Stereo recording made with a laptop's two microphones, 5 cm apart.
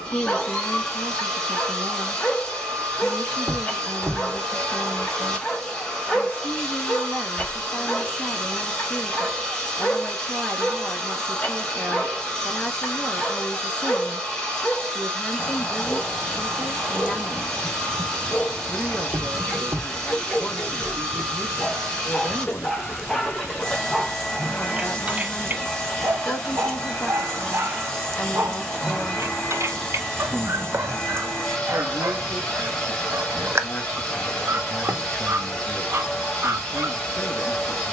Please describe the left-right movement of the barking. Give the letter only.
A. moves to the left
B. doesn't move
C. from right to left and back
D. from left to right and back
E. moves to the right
E.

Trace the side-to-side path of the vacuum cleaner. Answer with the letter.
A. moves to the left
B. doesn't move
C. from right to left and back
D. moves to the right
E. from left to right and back
B.